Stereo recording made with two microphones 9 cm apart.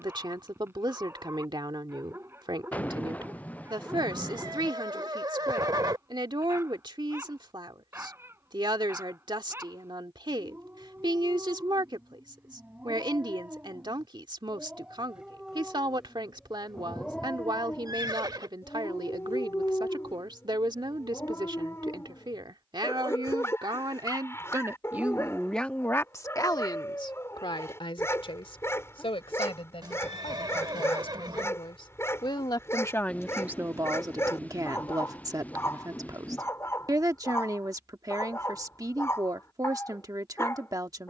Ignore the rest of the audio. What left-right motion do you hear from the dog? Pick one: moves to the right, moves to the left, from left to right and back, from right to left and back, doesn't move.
moves to the left.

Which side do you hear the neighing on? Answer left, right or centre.
right.